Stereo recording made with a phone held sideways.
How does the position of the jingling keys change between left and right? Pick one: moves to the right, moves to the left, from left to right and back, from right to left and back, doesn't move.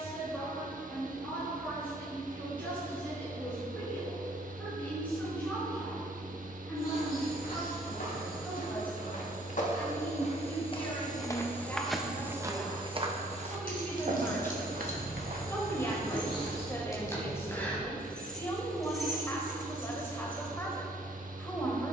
moves to the right.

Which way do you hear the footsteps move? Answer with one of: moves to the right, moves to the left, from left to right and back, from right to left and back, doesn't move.
moves to the right.